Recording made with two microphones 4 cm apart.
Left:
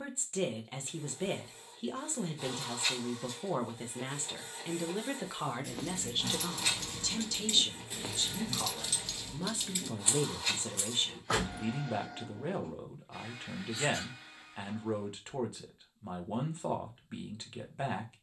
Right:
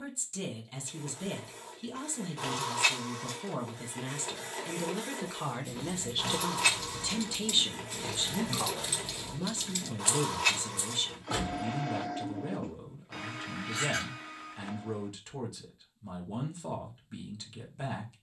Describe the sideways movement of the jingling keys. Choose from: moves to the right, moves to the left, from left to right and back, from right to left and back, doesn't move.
from left to right and back.